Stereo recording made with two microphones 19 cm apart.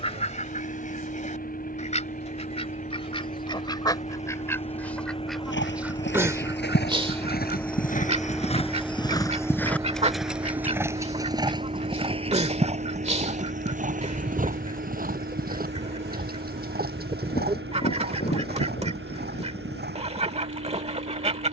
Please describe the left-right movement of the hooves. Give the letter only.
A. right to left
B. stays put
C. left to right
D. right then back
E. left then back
C.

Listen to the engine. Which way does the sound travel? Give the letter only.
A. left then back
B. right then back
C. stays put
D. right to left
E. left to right
E.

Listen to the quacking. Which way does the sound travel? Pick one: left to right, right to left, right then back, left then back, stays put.
left to right.